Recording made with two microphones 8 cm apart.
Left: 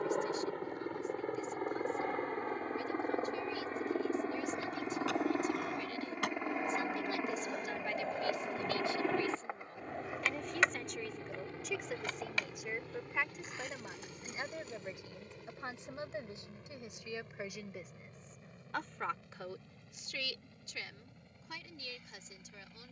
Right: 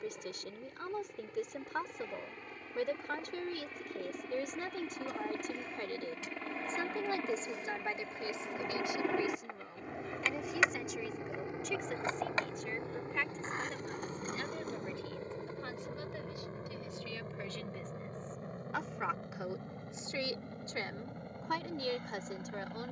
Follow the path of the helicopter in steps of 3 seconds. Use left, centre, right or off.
left, left, centre, centre, right, right, right, right.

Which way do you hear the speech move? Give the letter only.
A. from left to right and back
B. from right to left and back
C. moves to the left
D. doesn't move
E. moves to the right
B.